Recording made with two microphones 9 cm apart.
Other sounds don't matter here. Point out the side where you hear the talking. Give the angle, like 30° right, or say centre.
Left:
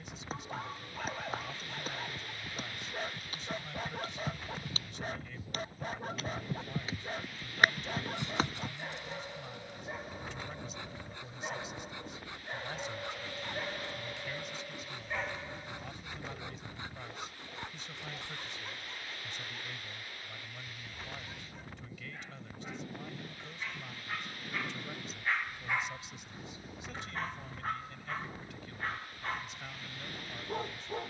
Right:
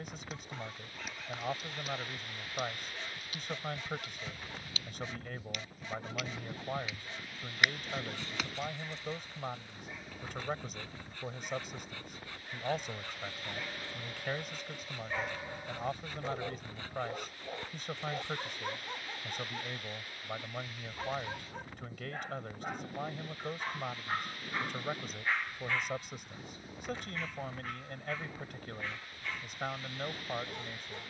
60° right.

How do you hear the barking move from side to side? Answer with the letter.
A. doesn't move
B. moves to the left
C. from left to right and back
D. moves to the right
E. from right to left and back
C.